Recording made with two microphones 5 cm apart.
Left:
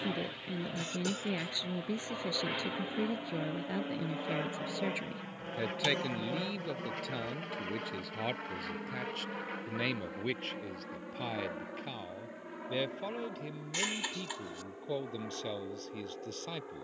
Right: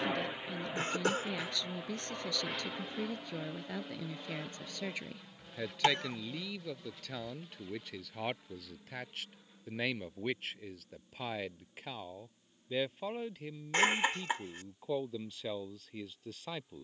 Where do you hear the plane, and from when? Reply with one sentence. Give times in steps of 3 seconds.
You can hear the plane in the centre from 0 s and on the left from 3 s.